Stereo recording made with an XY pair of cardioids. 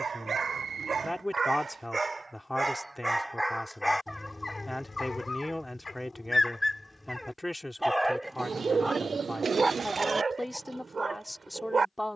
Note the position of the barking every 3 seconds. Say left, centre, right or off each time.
right, centre, centre, right.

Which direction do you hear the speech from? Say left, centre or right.
centre.